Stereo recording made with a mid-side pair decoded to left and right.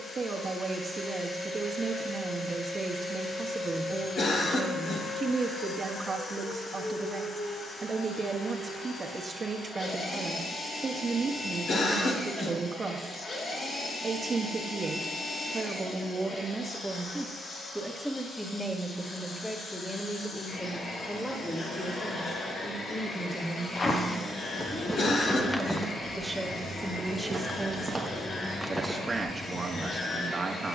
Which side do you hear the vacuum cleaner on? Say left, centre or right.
left.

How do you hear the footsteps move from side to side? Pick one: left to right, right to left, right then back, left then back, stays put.
right then back.